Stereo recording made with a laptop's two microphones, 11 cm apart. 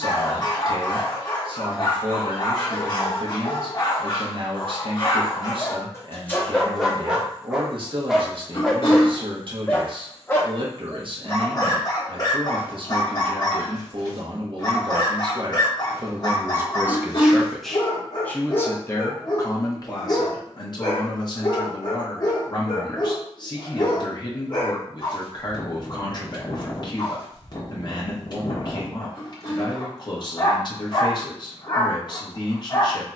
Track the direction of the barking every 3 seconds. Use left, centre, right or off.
left, left, centre, left, left, left, left, left, left, left, left.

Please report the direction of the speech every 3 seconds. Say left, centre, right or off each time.
right, right, right, right, right, right, left, left, left, left, left.